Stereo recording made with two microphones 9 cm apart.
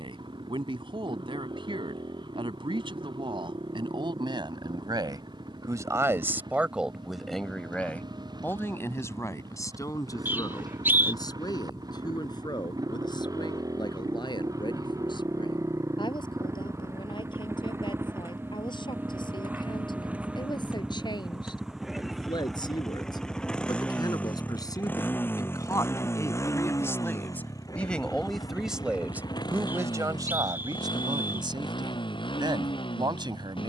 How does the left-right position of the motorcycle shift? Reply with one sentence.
In this clip you hear the motorcycle move from right to left.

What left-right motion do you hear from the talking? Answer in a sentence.
You can hear the talking move from right to left and back again.